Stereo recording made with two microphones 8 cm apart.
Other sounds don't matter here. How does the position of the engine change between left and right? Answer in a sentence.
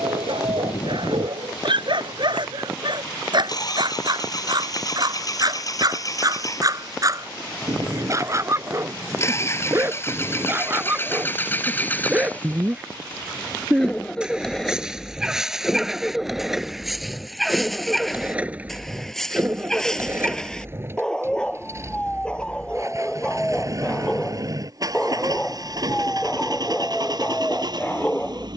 In this clip you hear the engine go from the left side to the right.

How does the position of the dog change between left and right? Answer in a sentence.
In this clip you hear the dog move to the left.